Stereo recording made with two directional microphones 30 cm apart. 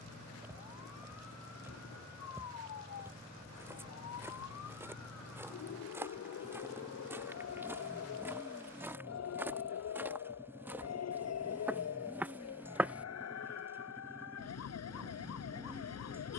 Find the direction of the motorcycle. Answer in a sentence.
In this clip you hear the motorcycle in the centre.